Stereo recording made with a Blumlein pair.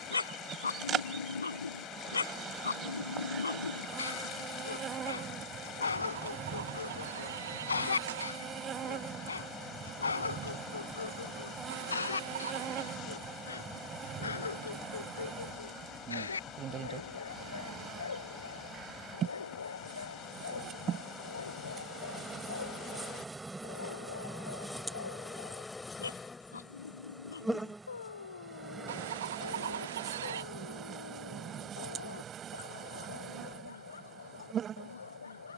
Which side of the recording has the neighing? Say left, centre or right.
right.